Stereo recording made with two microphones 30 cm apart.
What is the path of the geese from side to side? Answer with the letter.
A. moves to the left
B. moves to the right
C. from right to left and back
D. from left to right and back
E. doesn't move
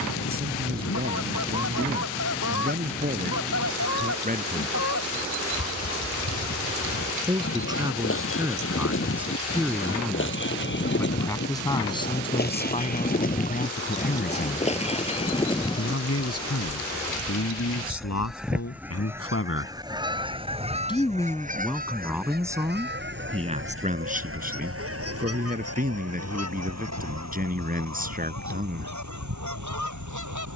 B.